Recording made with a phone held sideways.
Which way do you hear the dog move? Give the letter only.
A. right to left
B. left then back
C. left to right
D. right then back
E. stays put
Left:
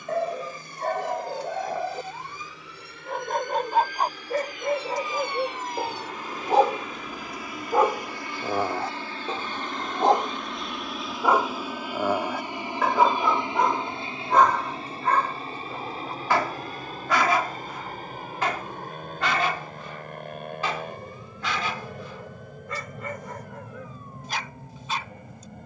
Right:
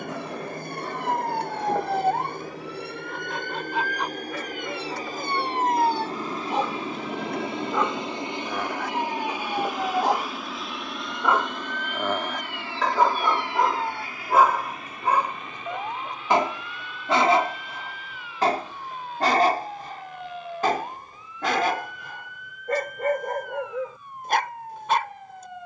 C.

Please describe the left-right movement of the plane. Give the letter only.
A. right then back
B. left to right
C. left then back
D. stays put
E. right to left
E.